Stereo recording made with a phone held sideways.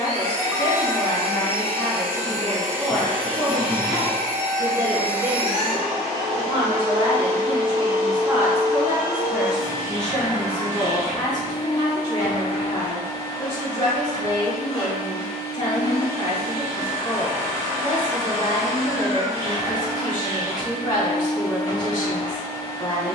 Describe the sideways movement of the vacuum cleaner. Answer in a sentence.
In this clip you hear the vacuum cleaner move to the left.